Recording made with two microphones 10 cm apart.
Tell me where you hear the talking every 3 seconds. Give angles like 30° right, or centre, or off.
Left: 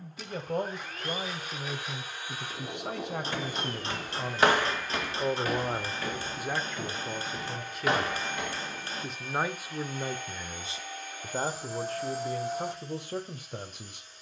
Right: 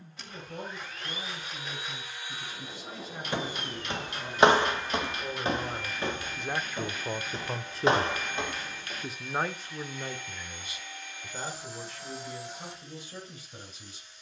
60° left, 50° left, 20° right, 20° left, 50° left.